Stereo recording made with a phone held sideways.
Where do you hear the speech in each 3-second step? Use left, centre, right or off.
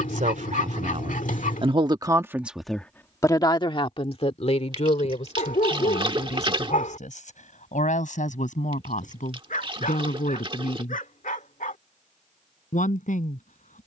right, left, left, left, left.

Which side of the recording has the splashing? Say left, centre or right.
right.